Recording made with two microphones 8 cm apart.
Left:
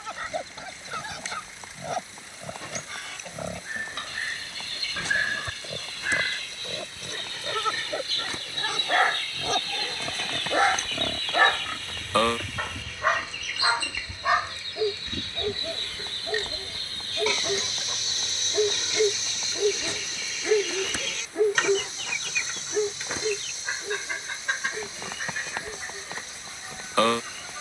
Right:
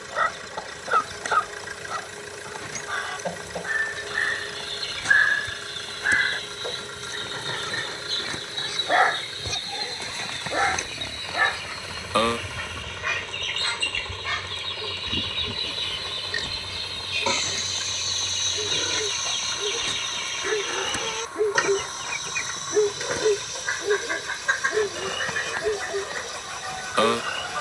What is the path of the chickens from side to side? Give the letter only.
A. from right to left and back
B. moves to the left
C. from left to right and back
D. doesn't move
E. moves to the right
A.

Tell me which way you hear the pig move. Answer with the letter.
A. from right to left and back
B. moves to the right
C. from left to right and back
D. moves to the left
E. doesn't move
B.